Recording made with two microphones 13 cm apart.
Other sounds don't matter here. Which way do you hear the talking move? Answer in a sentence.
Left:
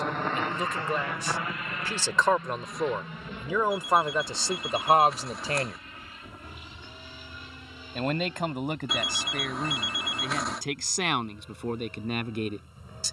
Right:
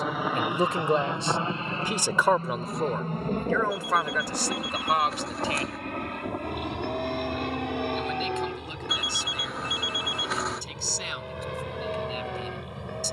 In this clip you hear the talking move from right to left.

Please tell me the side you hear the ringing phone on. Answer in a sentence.
You can hear the ringing phone in the centre.